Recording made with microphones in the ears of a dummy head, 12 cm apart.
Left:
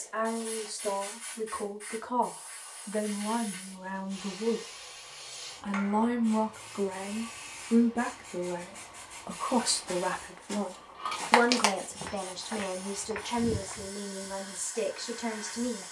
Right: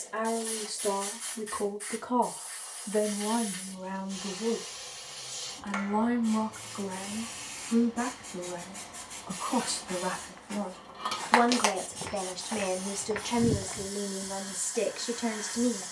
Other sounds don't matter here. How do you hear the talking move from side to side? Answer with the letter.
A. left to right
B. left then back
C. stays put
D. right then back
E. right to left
B.